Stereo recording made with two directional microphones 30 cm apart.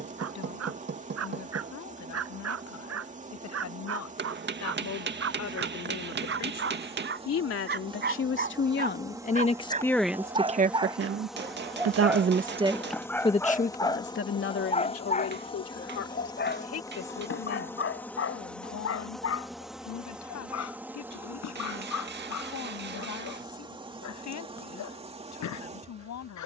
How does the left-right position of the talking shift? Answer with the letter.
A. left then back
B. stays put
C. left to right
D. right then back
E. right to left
D.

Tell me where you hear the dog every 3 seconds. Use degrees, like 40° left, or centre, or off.
50° right, 50° right, 40° right, 20° right, 10° left, 40° left, 50° left, 60° left, 70° left.